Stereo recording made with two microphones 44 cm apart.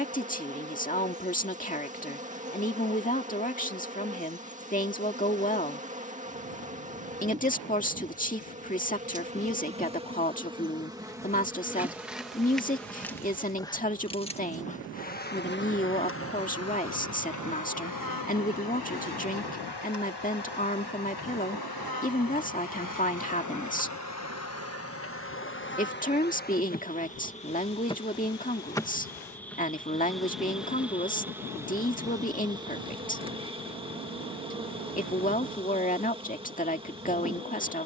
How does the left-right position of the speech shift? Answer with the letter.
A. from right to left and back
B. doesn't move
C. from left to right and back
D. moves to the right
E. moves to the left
B.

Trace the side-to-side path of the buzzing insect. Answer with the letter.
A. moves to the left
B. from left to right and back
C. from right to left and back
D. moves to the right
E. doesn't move
C.